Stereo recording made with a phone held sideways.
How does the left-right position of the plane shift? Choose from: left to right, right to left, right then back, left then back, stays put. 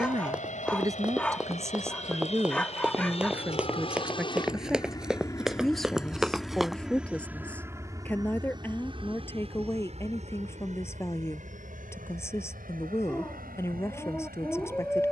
left to right.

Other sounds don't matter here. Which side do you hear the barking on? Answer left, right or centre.
centre.